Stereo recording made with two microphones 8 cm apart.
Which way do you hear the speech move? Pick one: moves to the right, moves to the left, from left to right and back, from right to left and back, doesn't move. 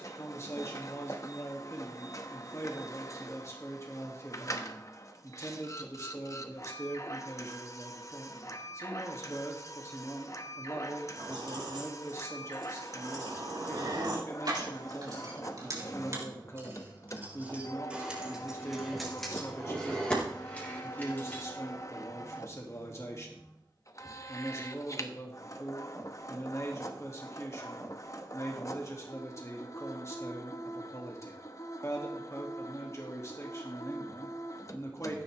doesn't move.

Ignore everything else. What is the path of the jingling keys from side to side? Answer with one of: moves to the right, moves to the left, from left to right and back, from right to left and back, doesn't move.
moves to the left.